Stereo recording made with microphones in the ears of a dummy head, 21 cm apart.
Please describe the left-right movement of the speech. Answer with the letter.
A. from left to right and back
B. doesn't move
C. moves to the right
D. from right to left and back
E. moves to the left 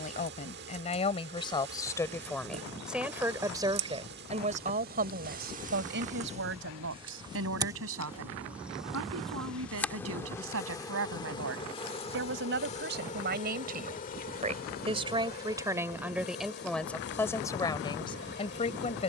A.